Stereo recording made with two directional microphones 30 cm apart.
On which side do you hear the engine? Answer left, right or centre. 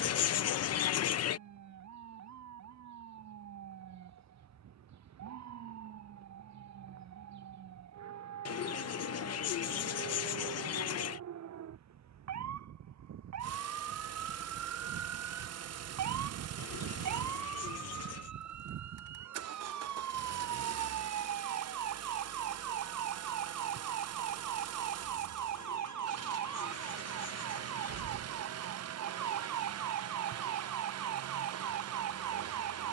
right.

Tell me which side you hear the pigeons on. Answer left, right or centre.
left.